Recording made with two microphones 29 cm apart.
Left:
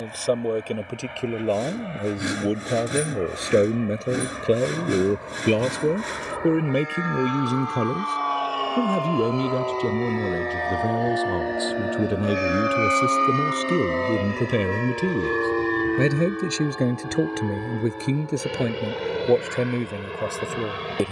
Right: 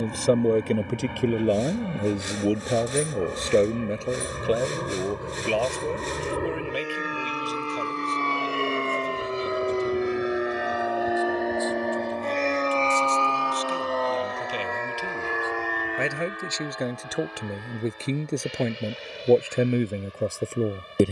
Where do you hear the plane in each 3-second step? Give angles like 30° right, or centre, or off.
60° right, 50° right, 40° right, 10° right, 20° left, 50° left, 60° left.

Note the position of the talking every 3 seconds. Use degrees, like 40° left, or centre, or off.
10° right, 30° left, 60° left, 80° left, 70° left, 40° left, 10° right.